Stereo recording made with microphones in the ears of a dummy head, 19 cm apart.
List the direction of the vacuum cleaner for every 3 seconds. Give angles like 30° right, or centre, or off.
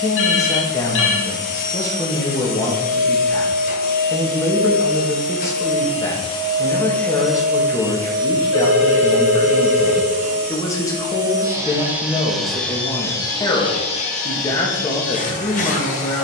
40° left, 40° left, centre, 30° right, 20° left, 40° left.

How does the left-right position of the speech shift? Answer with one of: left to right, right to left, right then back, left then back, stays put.
stays put.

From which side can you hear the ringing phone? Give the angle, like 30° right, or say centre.
60° left.